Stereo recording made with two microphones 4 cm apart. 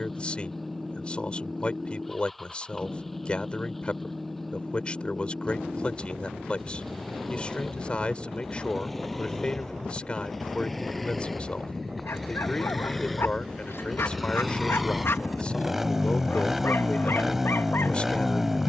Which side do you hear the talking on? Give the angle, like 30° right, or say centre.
30° left.